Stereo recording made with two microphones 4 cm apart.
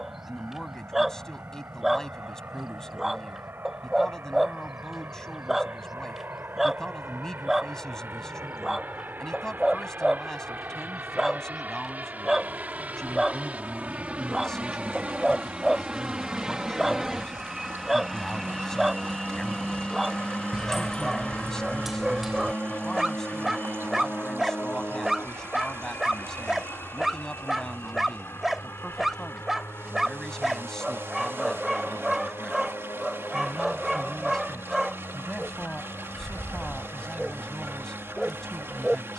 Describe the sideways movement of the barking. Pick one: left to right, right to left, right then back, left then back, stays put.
stays put.